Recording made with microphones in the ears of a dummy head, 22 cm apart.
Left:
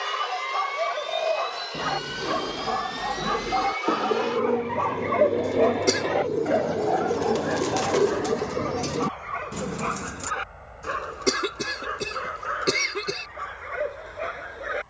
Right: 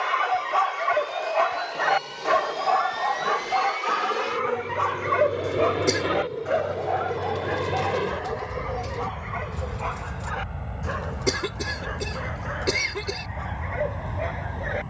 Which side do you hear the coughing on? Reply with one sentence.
In this clip you hear the coughing in the centre.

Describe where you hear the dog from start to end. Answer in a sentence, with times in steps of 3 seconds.
In this clip you hear the dog on the right from 0 s and in the centre from 6 s.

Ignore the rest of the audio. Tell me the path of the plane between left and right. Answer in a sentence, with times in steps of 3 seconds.
In this clip you hear the plane on the left from 0 s, in the centre from 3 s and on the right from 6 s.